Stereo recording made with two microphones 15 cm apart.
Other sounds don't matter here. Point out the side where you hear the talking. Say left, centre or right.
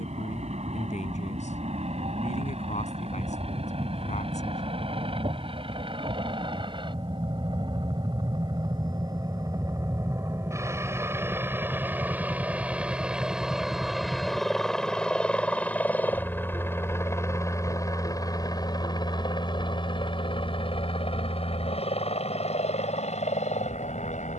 left.